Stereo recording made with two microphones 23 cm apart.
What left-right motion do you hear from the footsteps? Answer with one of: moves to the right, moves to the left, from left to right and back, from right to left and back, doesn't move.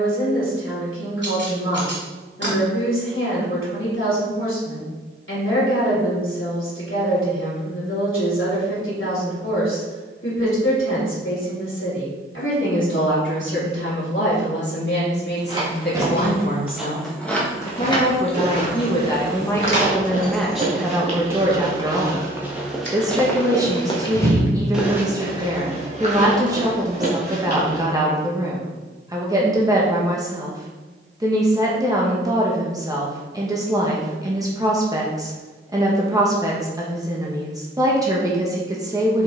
from right to left and back.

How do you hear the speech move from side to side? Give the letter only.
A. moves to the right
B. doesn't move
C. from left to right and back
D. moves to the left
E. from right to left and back
A.